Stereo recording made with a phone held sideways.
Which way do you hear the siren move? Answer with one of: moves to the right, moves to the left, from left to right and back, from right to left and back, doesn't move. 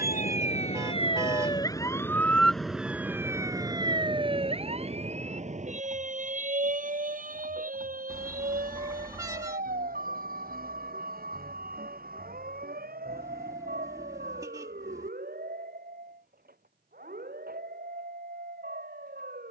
moves to the right.